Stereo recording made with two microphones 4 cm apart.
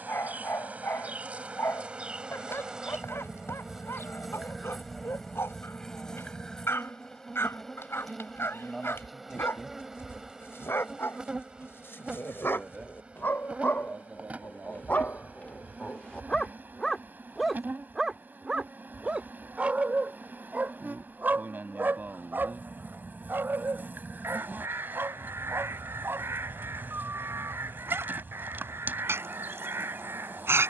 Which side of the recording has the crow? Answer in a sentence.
You can hear the crow on the right.